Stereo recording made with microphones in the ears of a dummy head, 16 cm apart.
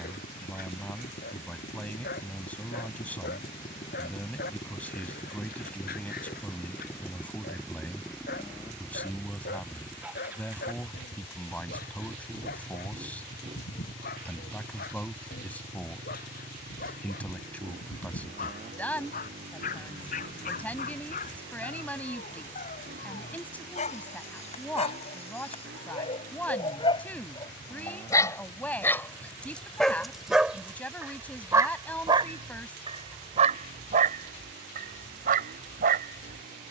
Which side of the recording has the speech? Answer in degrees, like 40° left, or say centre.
10° left.